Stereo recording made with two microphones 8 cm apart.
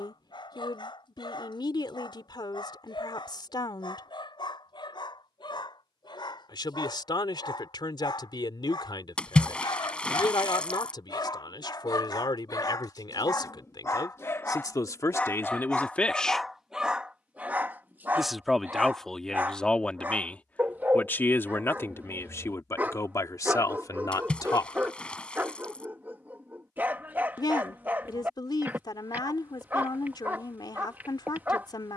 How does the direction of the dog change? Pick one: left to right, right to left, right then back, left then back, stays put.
left to right.